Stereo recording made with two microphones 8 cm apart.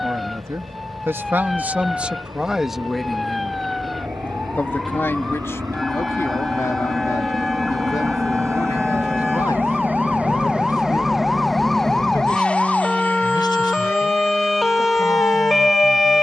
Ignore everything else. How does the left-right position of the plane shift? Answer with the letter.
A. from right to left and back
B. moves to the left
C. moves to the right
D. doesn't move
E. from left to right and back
B.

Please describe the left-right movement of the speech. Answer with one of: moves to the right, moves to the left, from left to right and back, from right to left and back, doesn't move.
moves to the left.